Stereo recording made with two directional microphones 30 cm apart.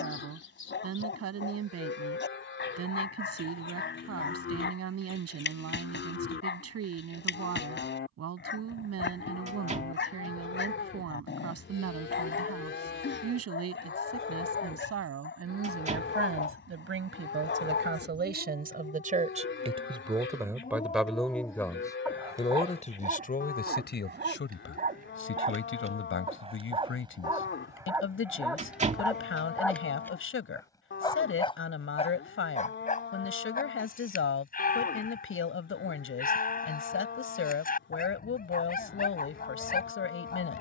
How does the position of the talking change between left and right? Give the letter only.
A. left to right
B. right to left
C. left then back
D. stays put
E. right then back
B.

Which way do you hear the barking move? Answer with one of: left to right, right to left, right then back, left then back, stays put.
right then back.